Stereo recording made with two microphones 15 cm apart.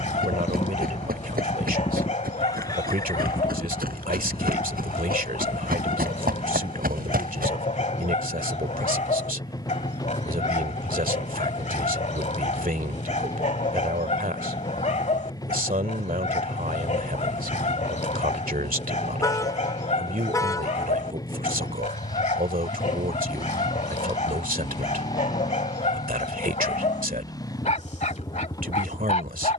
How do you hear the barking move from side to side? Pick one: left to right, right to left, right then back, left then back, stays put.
stays put.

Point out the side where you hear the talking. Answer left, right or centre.
right.